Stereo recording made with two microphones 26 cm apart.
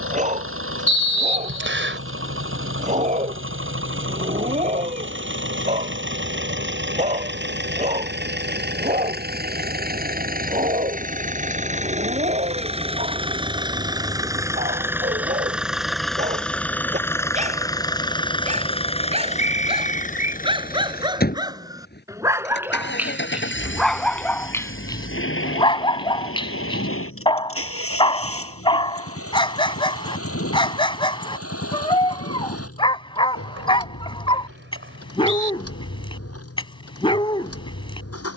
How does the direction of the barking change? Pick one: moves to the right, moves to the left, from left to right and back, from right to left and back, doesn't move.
moves to the left.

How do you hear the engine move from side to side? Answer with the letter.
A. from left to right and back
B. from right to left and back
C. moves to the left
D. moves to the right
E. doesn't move
C.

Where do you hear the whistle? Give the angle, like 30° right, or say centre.
50° right.